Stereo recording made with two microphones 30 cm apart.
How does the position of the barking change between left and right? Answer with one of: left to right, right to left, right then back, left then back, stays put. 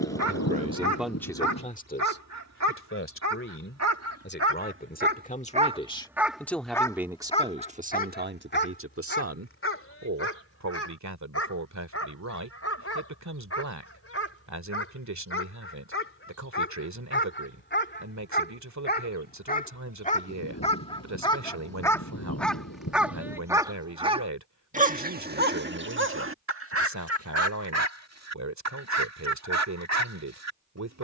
left then back.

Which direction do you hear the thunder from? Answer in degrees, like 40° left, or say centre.
60° left.